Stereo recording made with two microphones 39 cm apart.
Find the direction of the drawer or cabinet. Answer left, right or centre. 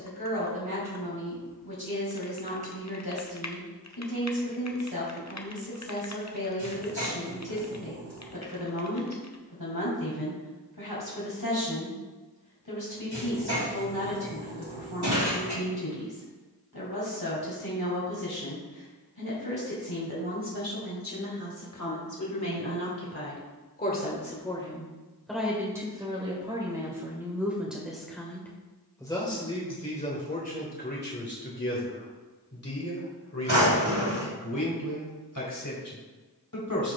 right.